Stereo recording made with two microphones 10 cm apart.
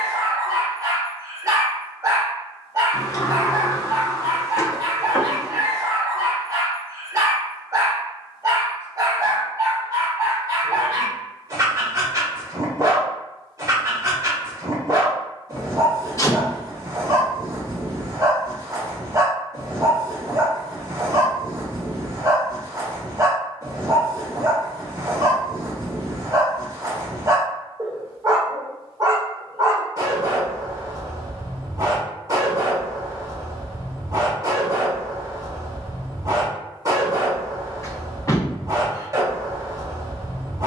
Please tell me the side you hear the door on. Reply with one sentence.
You can hear the door on the left.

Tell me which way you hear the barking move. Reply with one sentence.
In this clip you hear the barking stay put.